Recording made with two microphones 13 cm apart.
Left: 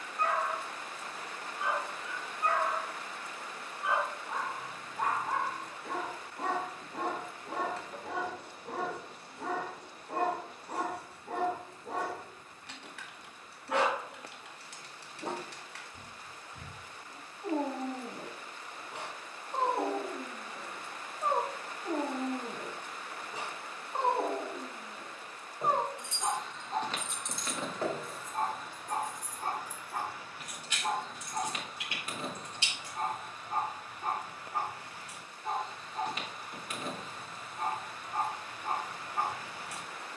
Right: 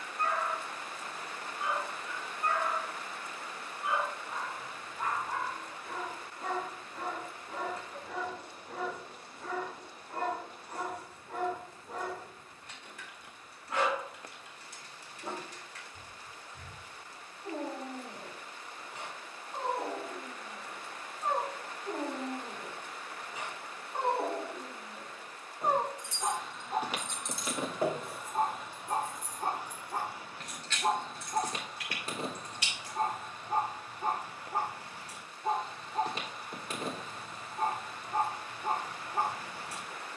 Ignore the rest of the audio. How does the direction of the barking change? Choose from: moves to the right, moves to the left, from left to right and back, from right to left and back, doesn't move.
moves to the right.